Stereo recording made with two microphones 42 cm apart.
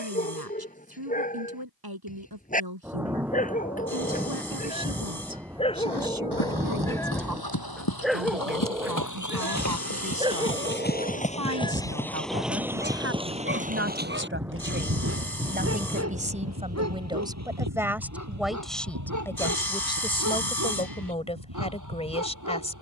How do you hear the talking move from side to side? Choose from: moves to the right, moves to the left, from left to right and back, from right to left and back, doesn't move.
moves to the left.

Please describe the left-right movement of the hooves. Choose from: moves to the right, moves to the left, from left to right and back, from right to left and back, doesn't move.
moves to the right.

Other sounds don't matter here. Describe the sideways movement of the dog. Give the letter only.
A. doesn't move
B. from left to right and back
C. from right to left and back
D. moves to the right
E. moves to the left
D.